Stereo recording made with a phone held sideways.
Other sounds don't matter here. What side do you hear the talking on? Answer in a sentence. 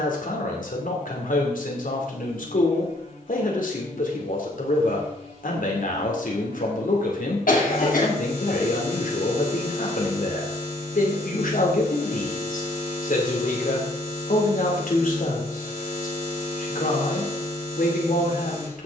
You can hear the talking on the left.